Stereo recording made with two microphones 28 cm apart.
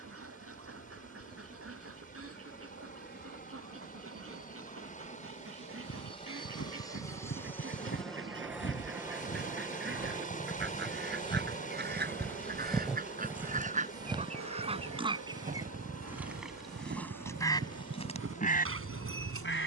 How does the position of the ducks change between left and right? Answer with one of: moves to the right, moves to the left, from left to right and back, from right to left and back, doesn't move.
moves to the left.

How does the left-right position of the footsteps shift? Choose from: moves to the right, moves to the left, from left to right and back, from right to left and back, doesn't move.
moves to the right.